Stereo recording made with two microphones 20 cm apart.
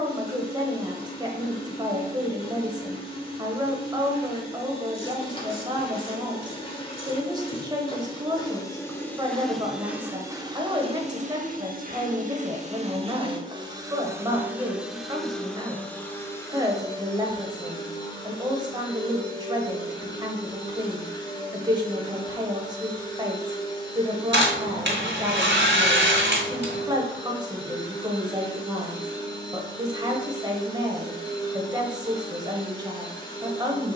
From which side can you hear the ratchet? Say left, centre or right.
right.